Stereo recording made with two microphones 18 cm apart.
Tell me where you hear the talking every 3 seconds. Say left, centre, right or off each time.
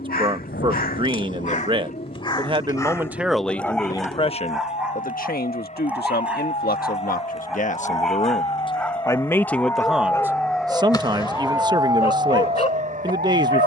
right, left, left, centre, right.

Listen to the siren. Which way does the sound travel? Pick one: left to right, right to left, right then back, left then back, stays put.
left to right.